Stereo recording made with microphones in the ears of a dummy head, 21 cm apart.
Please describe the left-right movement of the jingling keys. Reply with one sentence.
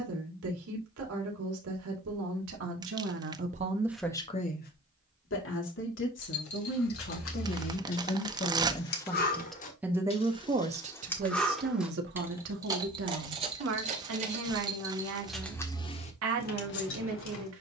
You can hear the jingling keys go right and come back.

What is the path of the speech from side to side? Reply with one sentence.
You can hear the speech go left and come back.